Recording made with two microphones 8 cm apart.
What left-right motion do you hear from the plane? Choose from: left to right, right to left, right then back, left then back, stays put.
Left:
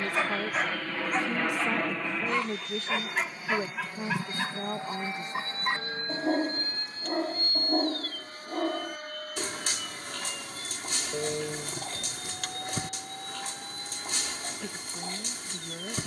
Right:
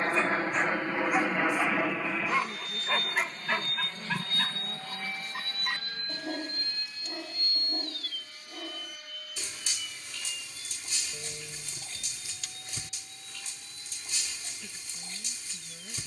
right to left.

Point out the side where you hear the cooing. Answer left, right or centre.
left.